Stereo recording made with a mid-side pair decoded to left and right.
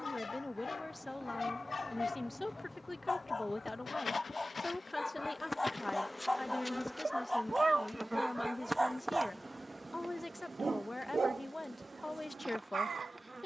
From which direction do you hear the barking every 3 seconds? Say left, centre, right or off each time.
left, left, centre, right, right.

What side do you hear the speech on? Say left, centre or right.
left.